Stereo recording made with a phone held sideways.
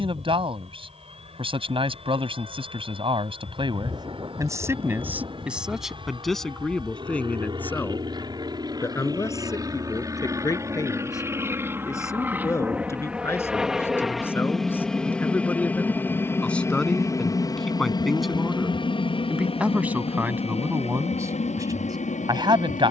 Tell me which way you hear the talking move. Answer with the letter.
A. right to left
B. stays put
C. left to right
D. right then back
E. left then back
E.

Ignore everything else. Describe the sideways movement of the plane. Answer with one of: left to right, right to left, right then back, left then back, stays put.
right to left.